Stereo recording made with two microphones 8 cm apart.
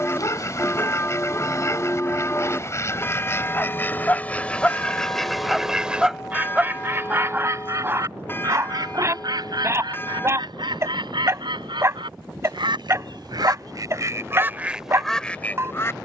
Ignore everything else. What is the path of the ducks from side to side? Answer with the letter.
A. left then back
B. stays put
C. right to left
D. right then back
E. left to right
D.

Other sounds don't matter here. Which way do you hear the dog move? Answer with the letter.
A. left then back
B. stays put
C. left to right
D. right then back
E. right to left
C.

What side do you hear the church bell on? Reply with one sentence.
You can hear the church bell on the left.